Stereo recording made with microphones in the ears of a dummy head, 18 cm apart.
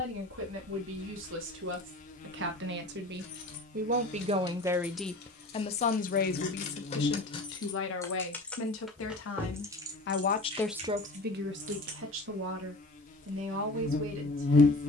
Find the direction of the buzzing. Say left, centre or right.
left.